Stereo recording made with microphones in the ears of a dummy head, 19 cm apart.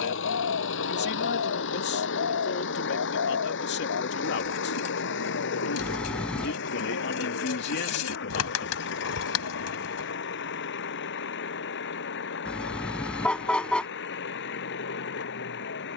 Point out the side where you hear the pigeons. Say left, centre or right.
left.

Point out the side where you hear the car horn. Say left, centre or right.
centre.